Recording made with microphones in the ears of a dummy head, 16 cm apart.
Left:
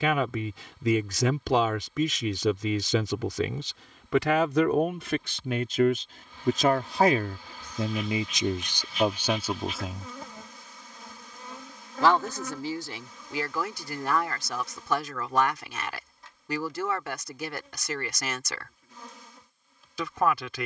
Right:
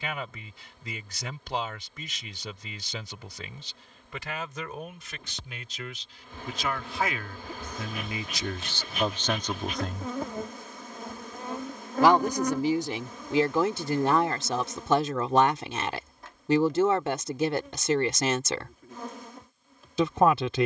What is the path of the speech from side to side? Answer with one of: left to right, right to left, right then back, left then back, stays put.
left to right.